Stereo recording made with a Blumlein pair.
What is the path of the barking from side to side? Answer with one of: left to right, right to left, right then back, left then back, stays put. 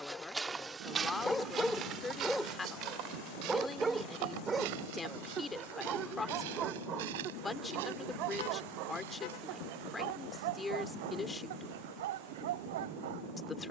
left to right.